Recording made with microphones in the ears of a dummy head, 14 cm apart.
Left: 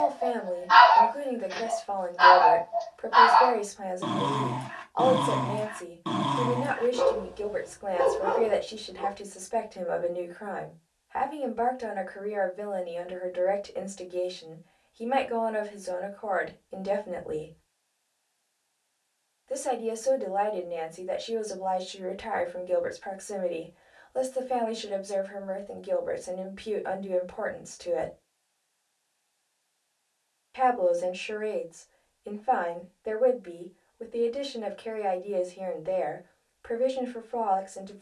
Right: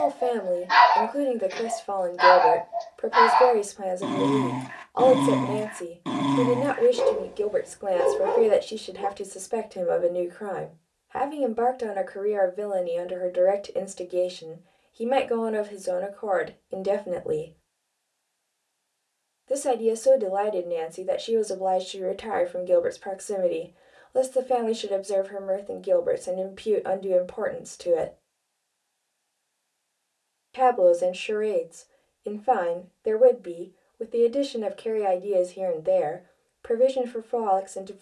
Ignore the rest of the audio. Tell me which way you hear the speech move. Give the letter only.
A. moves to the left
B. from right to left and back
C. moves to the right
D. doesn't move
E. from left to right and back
D.